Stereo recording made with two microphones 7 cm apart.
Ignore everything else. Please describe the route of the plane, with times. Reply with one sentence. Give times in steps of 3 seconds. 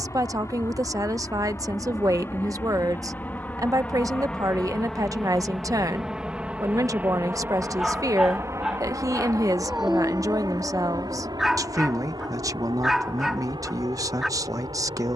In this clip you hear the plane on the left from 0 s, in the centre from 3 s and on the right from 6 s.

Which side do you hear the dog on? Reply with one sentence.
You can hear the dog in the centre.